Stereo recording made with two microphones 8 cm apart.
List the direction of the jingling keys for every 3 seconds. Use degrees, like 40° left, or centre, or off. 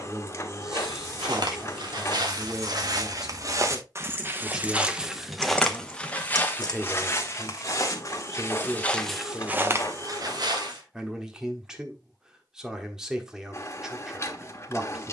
50° right, 10° right, 50° left, off, off.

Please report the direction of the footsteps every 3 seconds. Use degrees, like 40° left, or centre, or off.
60° right, 20° right, 30° left, 40° right, off.